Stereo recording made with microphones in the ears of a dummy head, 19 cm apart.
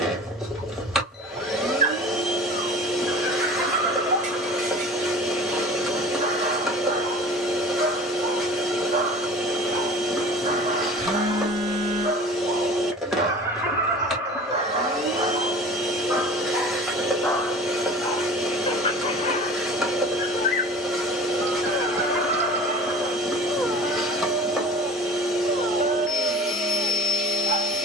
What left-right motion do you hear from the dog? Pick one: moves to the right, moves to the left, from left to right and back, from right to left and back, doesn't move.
from right to left and back.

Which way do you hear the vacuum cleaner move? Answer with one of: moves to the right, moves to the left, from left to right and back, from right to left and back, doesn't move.
doesn't move.